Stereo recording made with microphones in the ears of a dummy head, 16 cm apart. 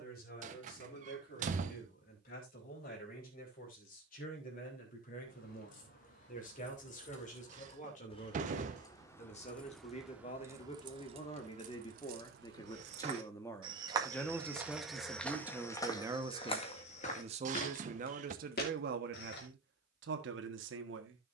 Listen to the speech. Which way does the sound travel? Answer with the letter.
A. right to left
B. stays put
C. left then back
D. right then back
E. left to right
E.